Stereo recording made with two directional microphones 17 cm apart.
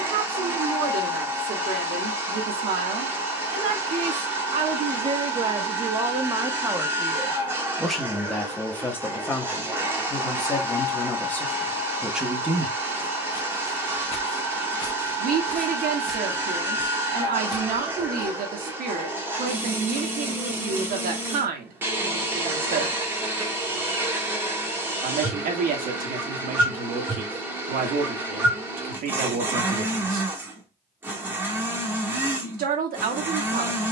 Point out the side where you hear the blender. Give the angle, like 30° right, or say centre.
10° right.